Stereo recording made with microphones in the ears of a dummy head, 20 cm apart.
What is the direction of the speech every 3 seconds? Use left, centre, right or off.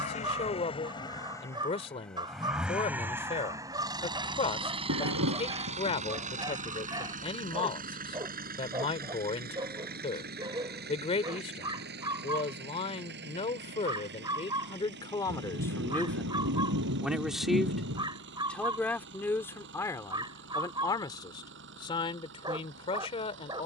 left, left, left, left, left, centre, centre, left.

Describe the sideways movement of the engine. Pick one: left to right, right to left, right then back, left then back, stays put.
left to right.